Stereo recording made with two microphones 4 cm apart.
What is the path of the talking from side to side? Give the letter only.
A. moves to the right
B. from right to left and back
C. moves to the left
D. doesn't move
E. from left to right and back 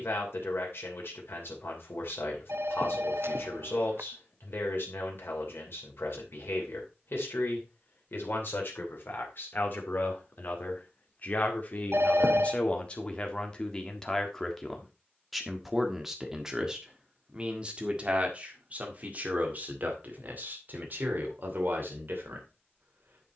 A.